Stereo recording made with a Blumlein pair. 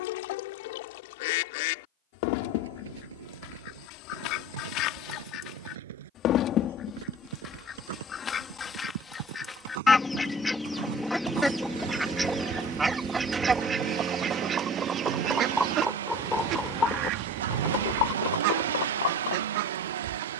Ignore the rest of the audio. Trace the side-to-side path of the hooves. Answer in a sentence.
In this clip you hear the hooves go from the right side to the left.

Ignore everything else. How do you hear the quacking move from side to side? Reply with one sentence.
In this clip you hear the quacking travel towards the right.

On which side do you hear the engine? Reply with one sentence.
You can hear the engine on the right.